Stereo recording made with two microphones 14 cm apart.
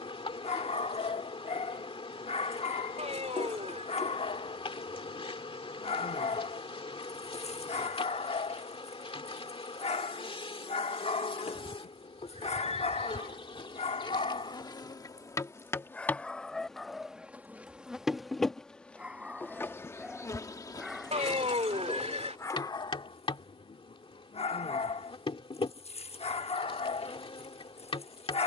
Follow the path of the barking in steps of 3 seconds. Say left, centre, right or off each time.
left, left, left, left, left, centre, centre, left, left, left.